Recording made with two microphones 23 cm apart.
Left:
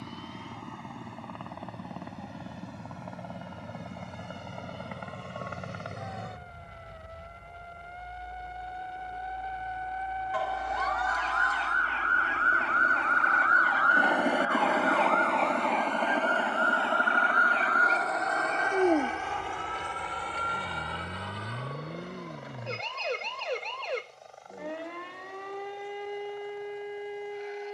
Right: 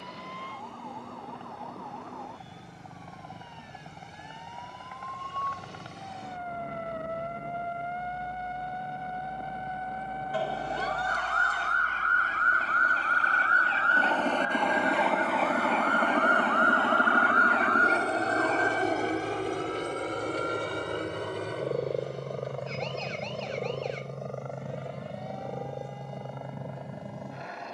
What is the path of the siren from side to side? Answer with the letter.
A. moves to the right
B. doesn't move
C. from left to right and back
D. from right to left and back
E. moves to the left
E.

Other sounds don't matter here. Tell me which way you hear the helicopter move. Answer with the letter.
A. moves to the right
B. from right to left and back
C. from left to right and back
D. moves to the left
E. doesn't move
A.